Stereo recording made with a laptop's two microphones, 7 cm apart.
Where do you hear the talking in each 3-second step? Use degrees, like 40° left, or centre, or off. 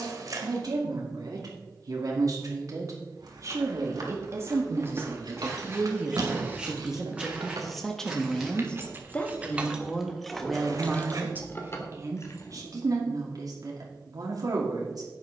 50° right, 30° right, centre, centre, 50° right.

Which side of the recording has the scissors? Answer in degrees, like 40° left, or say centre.
50° right.